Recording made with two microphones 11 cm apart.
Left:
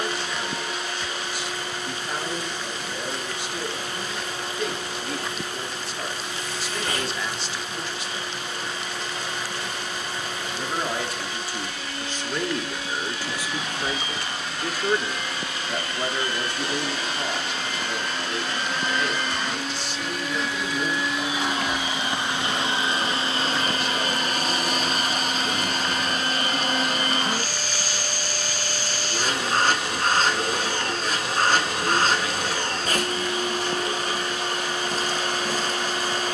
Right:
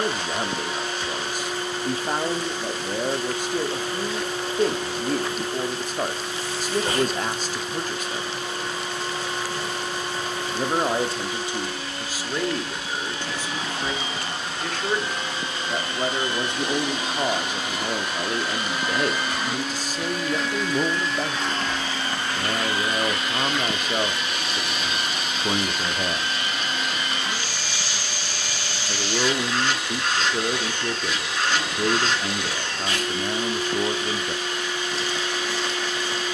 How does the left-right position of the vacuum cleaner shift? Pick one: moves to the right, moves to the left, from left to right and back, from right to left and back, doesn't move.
moves to the left.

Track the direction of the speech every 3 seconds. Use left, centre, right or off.
right, right, right, right, centre, right, right, right, right, right, right, right.